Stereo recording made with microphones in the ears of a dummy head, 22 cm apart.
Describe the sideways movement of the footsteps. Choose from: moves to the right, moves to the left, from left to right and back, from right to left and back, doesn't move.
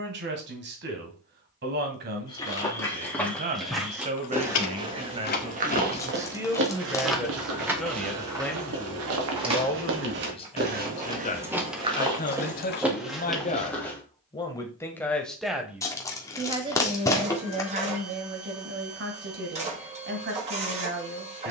from left to right and back.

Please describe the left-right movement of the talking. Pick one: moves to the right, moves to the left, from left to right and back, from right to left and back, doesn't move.
from right to left and back.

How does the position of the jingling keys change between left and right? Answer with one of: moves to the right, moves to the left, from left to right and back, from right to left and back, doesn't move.
from left to right and back.